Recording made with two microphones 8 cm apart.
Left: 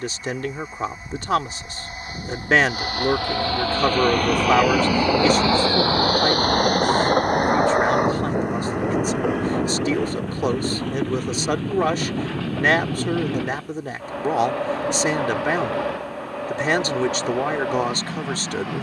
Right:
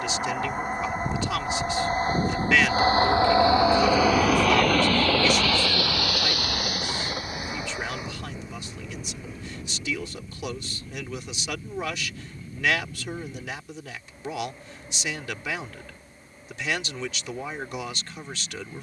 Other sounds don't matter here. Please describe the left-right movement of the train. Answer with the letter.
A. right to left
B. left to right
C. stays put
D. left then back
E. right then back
A.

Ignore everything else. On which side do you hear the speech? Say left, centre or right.
left.